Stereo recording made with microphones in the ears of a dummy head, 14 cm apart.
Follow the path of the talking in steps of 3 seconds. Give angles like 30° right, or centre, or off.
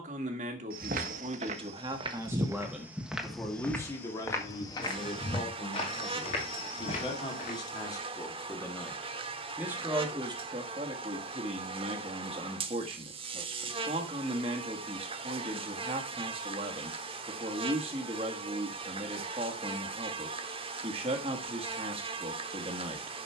30° right, 30° left, 20° left, 30° right, 30° right, 30° right, 30° right, 30° right.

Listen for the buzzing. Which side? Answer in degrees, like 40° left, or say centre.
30° right.